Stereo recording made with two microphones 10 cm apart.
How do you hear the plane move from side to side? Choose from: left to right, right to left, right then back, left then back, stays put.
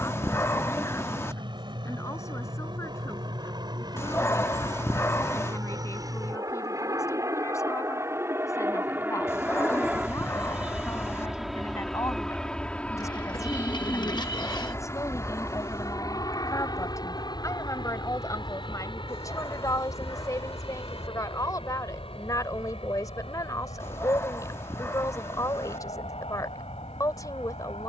right to left.